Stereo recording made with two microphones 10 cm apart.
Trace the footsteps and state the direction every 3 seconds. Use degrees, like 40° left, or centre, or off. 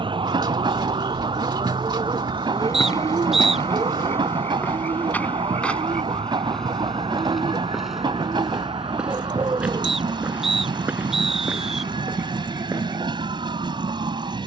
40° left, 20° left, centre, 10° right, 20° right.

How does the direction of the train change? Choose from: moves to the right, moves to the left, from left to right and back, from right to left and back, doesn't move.
doesn't move.